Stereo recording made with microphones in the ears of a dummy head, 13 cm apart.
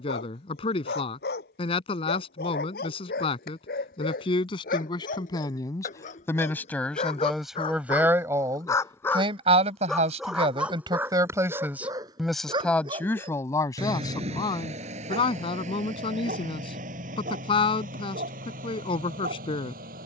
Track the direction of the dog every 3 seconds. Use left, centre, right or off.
left, left, left, centre, right, right, right.